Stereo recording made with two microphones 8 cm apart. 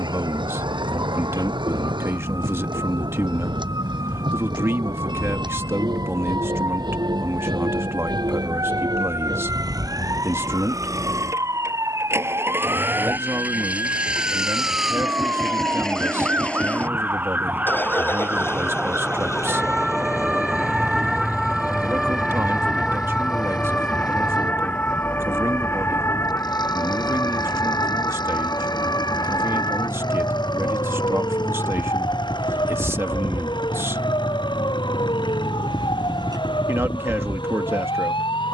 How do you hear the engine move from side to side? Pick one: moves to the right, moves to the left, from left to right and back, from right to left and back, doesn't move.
moves to the left.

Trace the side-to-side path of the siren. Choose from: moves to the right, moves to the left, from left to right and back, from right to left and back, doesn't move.
moves to the left.